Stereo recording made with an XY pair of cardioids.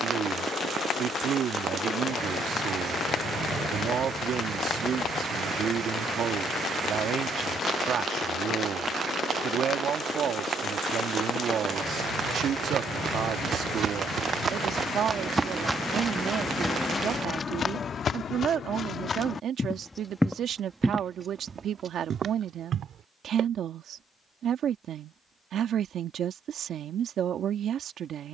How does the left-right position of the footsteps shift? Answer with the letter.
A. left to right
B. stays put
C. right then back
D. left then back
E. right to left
D.